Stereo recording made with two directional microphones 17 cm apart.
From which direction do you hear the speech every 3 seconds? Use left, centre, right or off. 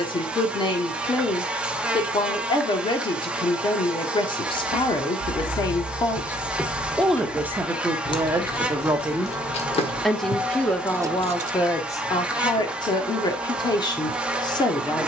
left, left, centre, centre, left.